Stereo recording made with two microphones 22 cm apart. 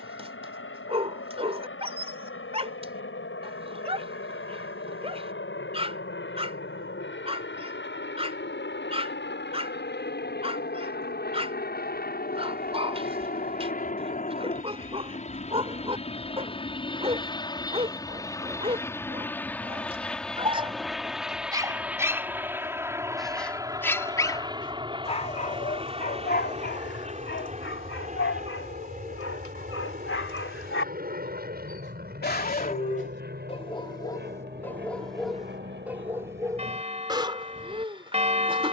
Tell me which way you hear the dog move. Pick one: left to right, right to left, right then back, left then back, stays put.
left then back.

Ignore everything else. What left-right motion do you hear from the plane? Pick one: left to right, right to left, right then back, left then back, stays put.
left to right.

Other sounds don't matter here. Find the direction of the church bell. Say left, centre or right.
right.